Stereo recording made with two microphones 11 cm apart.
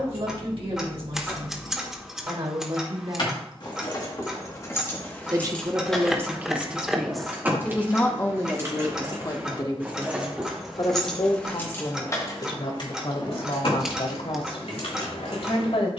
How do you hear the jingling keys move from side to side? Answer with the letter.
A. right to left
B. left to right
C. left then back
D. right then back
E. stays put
D.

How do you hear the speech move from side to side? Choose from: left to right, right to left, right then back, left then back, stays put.
right to left.